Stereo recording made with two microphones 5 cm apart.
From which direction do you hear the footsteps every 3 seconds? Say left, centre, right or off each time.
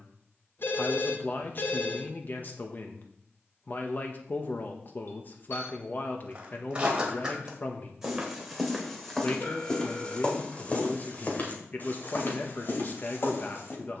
off, off, centre, left, left.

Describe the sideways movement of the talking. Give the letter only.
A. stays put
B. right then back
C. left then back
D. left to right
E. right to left
A.